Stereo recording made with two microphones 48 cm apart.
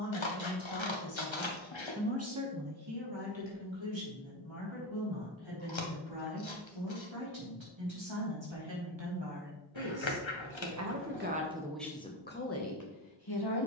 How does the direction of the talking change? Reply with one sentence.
You can hear the talking move from left to right and back again.